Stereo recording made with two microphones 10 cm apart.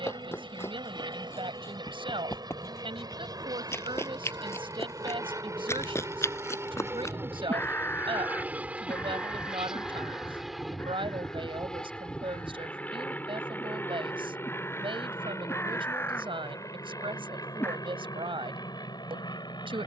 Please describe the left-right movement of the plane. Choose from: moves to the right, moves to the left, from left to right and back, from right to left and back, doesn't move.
moves to the left.